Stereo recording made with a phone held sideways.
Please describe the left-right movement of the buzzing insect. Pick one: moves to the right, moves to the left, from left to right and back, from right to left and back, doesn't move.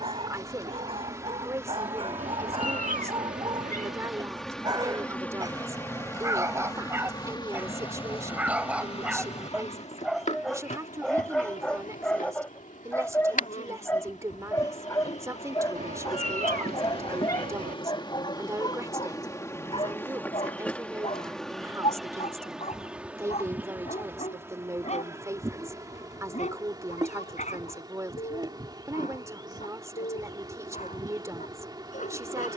from right to left and back.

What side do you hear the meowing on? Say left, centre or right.
right.